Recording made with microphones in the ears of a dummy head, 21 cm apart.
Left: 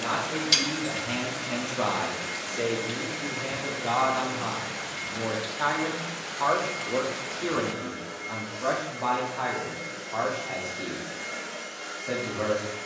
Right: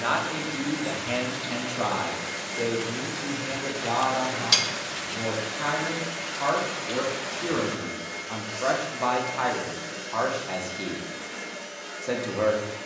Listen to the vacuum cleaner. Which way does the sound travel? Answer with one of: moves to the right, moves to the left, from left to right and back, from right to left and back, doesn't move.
from left to right and back.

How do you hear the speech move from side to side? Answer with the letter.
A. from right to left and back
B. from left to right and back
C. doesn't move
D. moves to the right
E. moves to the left
A.